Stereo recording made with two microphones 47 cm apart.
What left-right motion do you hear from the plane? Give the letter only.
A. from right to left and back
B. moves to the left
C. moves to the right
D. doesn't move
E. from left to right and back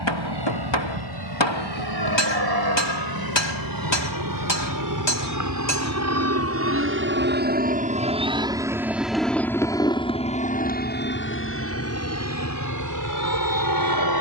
B.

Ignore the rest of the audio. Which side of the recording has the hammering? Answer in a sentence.
You can hear the hammering on the left.